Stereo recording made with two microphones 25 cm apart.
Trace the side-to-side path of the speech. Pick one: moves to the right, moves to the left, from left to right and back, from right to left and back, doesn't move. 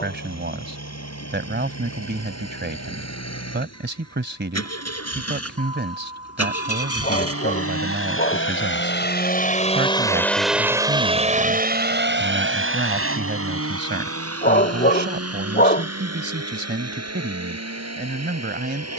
doesn't move.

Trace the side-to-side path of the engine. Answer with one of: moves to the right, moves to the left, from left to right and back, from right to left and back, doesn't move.
moves to the right.